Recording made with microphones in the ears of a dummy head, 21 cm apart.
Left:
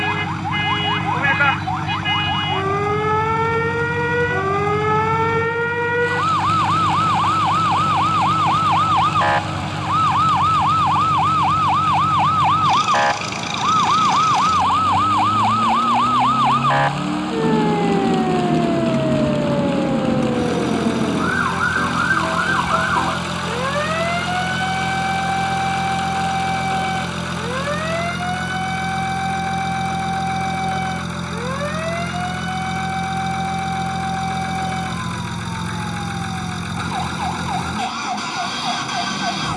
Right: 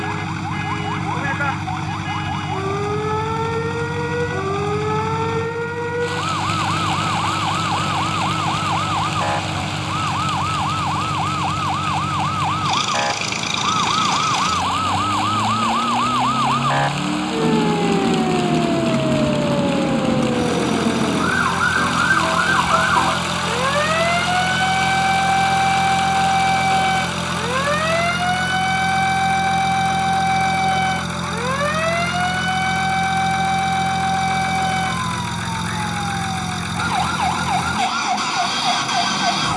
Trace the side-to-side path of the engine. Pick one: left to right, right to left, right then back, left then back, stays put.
stays put.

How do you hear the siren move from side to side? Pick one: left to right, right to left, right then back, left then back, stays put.
left to right.